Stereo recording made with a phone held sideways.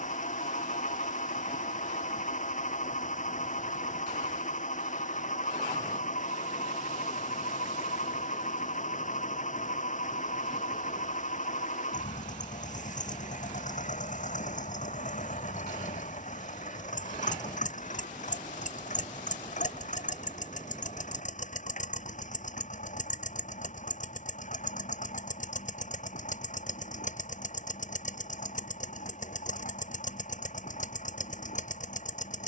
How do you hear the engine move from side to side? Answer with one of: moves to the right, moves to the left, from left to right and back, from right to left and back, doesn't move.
doesn't move.